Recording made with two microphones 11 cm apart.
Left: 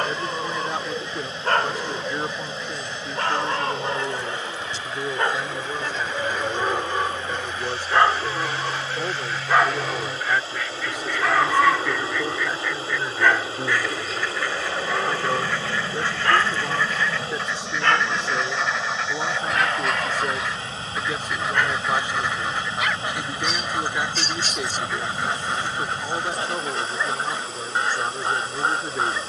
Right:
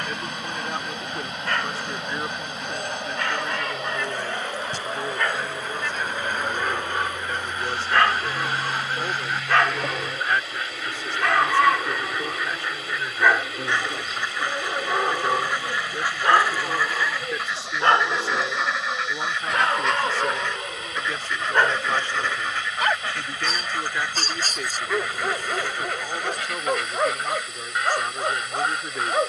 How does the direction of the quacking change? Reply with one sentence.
In this clip you hear the quacking go from the right side to the left.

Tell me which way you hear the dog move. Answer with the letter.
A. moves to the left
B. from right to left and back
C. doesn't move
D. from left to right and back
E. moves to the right
E.